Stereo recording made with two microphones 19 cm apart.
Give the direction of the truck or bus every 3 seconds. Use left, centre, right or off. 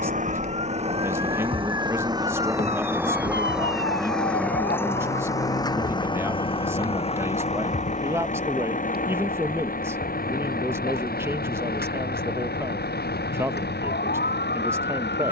right, centre, left, left, left.